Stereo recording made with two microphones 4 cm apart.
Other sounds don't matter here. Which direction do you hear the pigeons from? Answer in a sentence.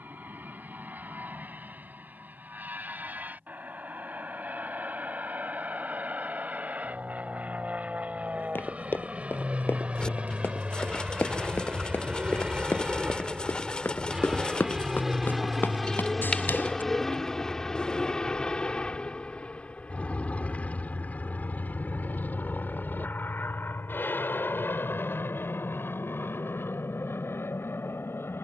You can hear the pigeons on the left.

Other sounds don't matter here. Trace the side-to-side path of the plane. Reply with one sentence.
You can hear the plane move to the left.